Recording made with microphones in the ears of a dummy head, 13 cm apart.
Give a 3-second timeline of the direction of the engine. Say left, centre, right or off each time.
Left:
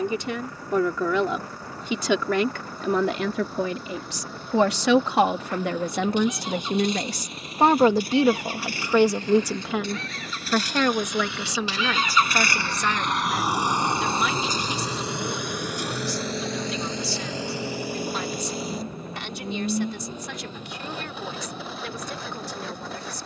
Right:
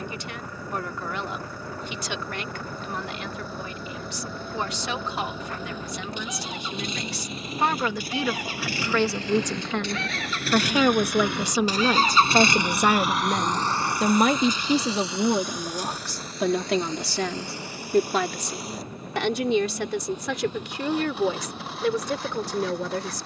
right, right, right, right, centre, left, left, left.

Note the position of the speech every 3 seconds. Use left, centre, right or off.
left, left, left, centre, right, right, right, right.